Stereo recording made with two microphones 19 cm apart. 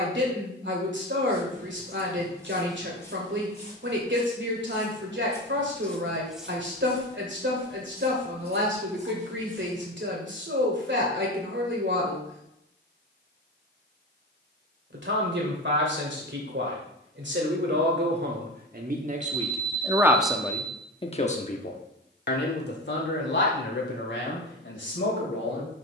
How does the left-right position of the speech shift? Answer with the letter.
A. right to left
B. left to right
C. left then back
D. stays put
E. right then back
A.